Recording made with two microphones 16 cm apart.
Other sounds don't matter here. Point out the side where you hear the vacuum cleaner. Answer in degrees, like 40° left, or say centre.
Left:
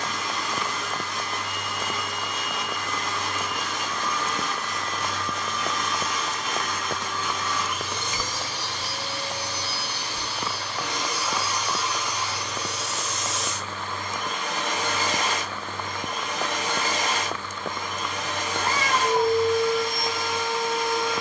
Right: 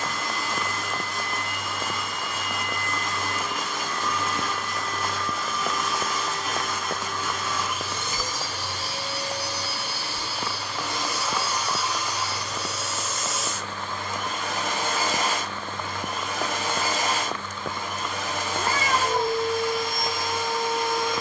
10° right.